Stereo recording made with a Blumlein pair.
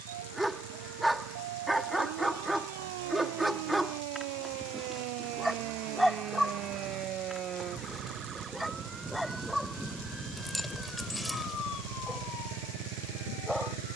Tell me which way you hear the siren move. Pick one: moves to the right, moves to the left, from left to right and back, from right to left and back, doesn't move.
moves to the left.